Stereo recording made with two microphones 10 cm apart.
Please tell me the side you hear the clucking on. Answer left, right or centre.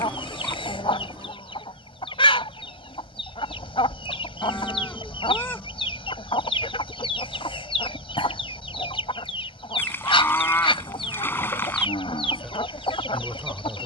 left.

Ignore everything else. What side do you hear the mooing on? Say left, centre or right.
left.